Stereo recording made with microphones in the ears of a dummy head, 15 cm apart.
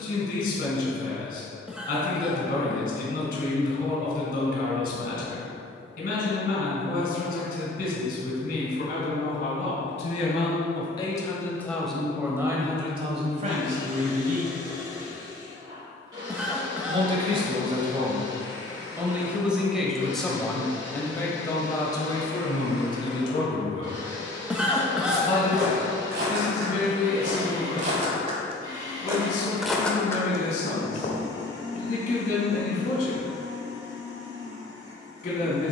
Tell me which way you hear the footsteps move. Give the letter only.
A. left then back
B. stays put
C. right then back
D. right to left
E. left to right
D.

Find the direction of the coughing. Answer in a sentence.
You can hear the coughing in the centre.